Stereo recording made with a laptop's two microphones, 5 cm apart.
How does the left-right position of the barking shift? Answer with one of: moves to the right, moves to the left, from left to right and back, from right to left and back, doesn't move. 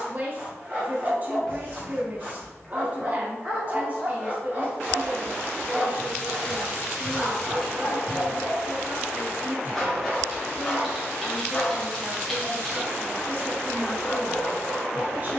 moves to the left.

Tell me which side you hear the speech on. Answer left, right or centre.
right.